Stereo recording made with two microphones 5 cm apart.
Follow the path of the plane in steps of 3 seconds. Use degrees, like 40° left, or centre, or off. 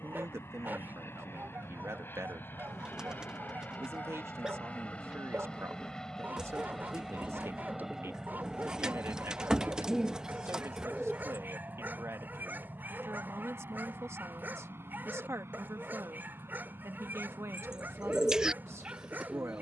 50° left, 30° left, centre, 30° right, 40° right, 50° right, 50° right.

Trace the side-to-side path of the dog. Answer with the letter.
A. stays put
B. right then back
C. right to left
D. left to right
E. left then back
A.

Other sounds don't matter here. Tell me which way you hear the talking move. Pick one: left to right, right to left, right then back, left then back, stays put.
stays put.